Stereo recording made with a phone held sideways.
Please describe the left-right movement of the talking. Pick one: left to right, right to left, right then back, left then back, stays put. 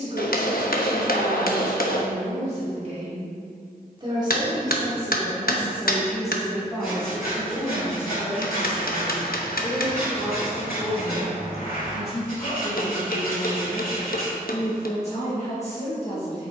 right to left.